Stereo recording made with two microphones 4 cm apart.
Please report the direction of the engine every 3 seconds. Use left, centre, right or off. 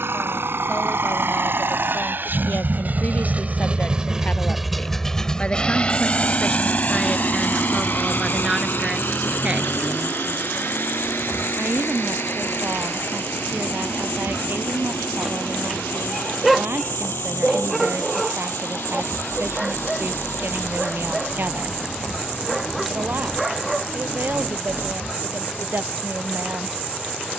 right, centre, left, left, left, left, left, left, left.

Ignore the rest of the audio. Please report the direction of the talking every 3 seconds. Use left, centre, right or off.
left, left, centre, right, right, right, right, right, right.